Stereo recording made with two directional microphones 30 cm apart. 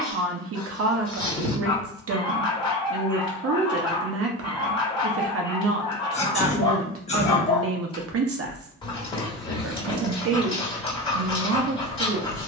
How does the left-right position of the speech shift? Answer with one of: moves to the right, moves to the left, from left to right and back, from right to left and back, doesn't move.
doesn't move.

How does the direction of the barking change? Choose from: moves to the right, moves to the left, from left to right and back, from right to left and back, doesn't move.
doesn't move.